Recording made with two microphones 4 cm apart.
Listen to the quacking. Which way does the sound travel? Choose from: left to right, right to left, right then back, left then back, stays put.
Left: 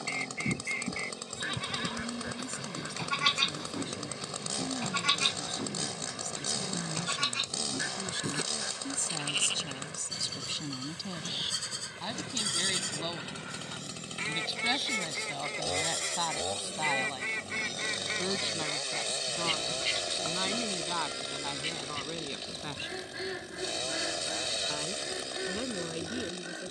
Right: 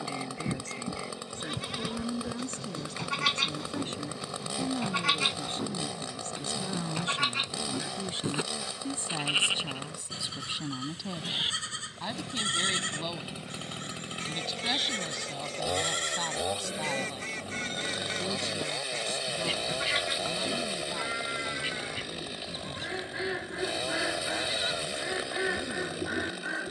left to right.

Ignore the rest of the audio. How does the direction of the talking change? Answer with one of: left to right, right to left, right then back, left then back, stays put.
right to left.